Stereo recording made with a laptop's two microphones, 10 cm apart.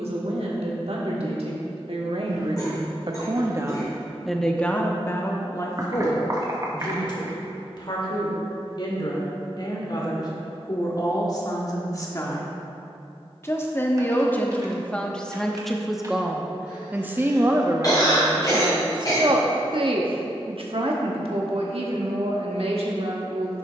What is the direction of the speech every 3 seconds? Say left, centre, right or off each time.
right, centre, left, left, left, centre, right, right.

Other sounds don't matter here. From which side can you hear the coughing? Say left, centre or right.
left.